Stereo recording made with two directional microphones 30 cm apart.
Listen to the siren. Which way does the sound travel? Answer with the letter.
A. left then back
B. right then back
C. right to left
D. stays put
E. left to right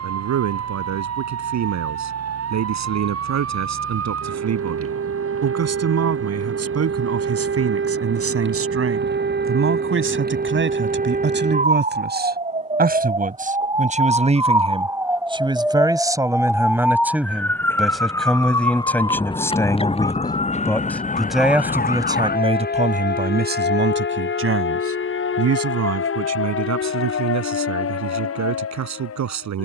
C.